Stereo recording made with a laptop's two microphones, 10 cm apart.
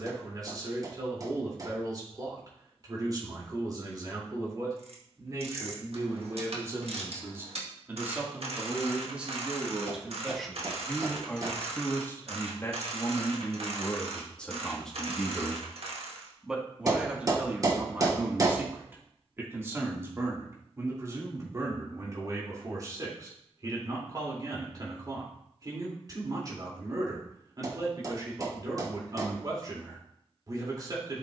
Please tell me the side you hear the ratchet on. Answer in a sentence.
You can hear the ratchet on the right.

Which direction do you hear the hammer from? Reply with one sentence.
In this clip you hear the hammer on the right.